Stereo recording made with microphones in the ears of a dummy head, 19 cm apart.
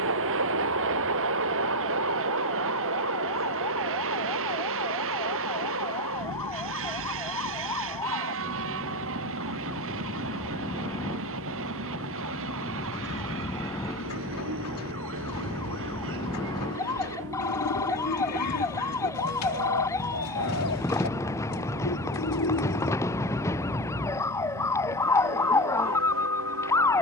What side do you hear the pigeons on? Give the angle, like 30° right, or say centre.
90° left.